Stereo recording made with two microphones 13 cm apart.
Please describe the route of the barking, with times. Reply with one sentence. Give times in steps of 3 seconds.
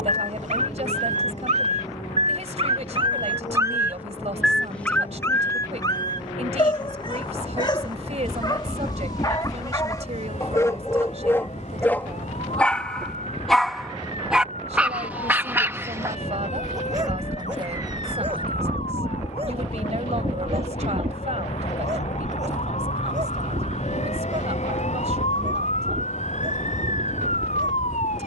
You can hear the barking on the right from 0 s, in the centre from 3 s, on the left from 6 s, in the centre from 12 s and on the right from 15 s.